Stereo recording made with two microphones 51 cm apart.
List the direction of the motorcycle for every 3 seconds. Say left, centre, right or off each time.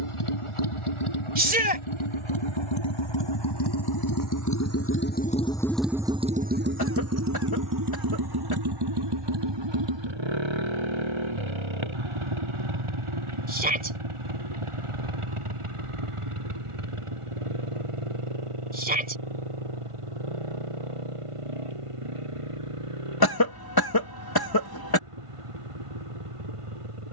left, left, right, right, right, right, right, right, right.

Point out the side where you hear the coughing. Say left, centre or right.
left.